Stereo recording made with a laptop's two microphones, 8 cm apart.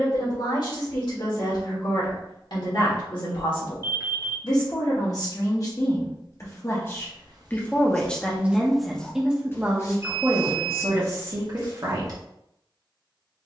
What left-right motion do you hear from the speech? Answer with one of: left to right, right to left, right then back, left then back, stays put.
left to right.